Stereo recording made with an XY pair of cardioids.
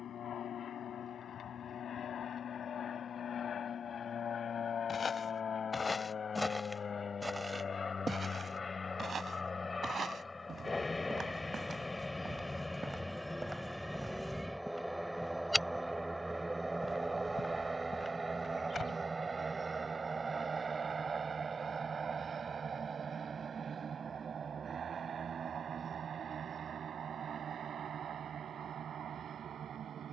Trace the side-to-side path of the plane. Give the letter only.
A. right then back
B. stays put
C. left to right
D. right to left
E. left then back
C.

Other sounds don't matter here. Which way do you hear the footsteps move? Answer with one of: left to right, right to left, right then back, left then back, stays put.
right then back.